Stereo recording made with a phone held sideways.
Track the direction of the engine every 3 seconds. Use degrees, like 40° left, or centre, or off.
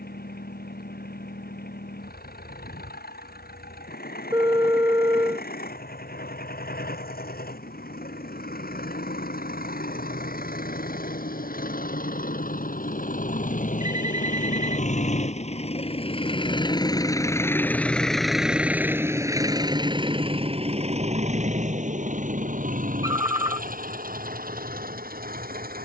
80° left, 80° left, 70° left, 70° left, 60° left, 30° left, 20° right, 50° right, 70° right.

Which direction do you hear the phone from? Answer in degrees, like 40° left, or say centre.
20° right.